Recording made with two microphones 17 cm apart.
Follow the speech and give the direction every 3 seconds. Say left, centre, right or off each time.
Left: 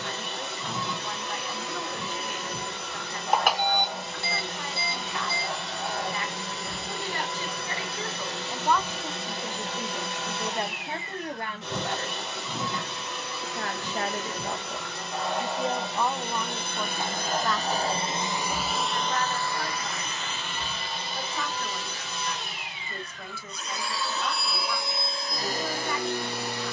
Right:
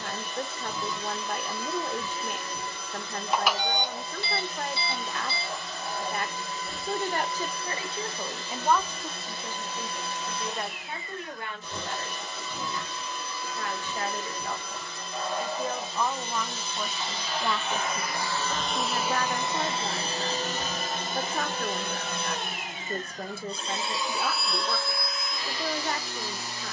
right, right, right, left, left, centre, right, right, right.